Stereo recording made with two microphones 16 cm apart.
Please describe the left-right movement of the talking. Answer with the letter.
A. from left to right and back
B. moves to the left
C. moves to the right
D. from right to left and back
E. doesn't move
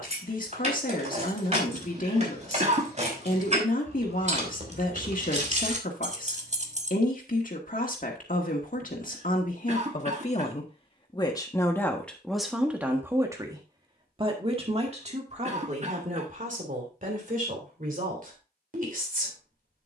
C.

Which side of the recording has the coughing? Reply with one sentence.
In this clip you hear the coughing on the right.